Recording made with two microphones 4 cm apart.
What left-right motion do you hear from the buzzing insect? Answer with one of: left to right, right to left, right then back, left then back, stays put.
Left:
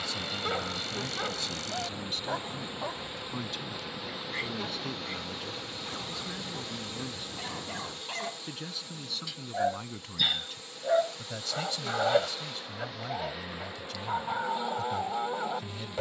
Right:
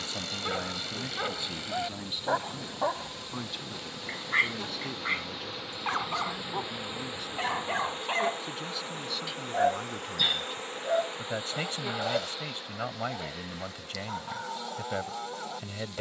right then back.